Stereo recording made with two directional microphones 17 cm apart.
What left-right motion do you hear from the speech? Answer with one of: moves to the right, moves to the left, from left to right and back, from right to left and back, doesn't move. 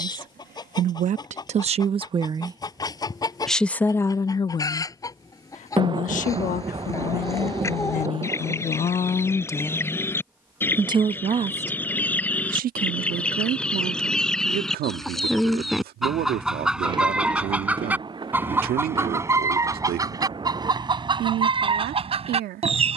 from right to left and back.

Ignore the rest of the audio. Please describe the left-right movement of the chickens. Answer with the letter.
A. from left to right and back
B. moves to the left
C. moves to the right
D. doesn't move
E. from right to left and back
C.